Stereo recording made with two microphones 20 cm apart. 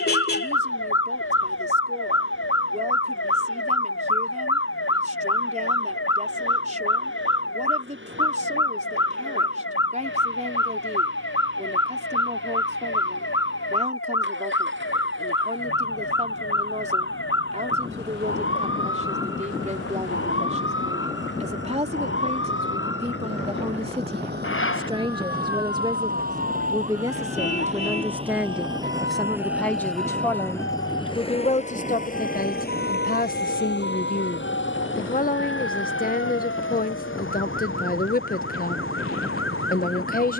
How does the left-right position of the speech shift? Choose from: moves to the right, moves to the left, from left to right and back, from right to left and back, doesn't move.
moves to the left.